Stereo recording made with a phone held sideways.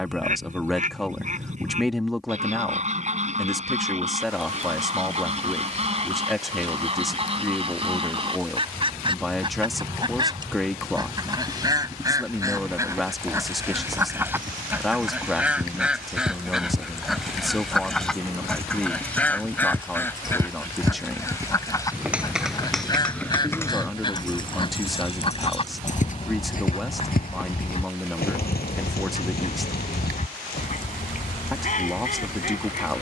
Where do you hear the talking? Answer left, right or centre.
centre.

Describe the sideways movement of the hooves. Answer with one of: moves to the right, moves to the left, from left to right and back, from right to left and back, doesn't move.
moves to the left.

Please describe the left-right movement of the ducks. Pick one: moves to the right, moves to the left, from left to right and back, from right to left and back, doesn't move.
moves to the left.